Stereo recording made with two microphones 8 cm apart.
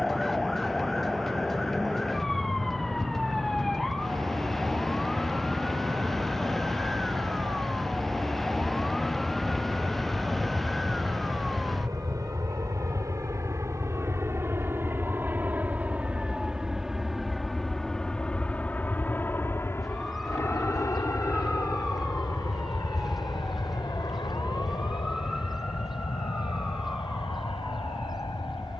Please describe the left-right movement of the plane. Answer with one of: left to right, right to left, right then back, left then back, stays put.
right to left.